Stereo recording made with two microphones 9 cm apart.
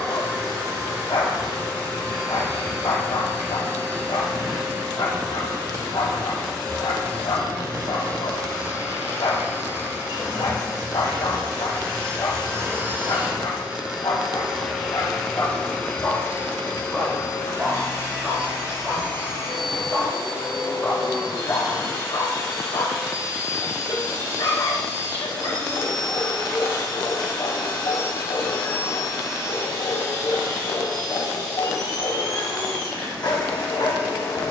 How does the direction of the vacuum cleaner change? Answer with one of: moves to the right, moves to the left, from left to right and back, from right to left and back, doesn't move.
moves to the left.